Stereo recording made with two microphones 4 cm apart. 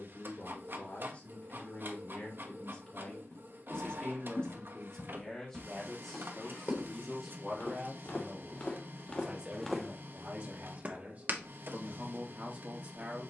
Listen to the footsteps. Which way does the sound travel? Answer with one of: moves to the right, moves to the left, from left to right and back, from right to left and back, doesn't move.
moves to the right.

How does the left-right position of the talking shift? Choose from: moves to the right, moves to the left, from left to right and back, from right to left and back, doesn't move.
moves to the right.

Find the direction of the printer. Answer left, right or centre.
right.